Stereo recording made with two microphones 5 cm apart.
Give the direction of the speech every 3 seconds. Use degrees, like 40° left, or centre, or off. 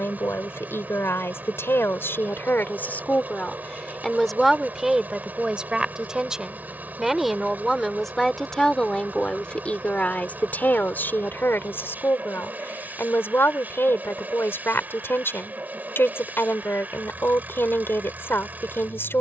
60° left, centre, centre, 40° left, 60° left, 60° left, 60° left.